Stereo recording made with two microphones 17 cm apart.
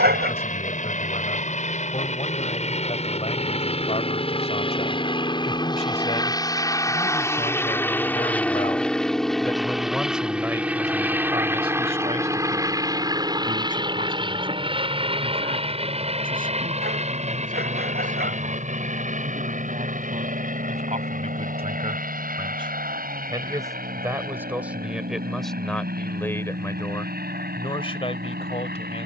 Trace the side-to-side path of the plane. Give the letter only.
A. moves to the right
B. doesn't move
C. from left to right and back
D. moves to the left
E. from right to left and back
A.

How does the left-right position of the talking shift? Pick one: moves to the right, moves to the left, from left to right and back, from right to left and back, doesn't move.
from left to right and back.